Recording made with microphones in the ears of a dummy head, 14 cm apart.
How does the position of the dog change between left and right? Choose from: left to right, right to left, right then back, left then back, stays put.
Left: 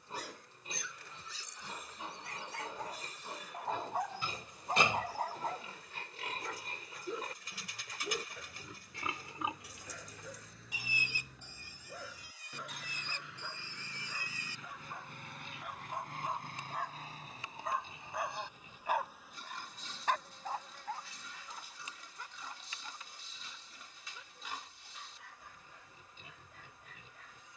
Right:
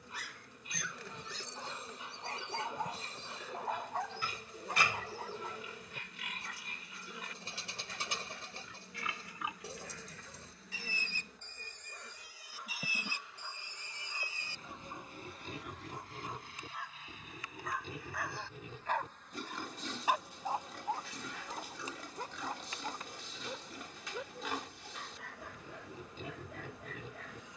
left then back.